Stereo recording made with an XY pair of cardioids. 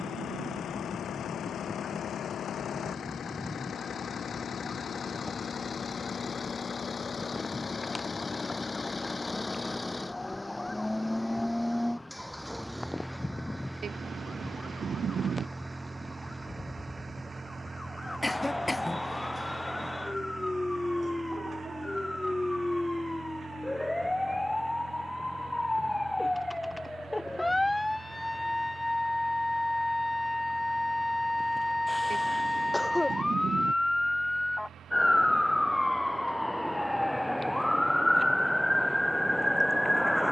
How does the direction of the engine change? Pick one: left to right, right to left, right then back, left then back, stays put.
left to right.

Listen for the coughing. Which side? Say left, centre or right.
centre.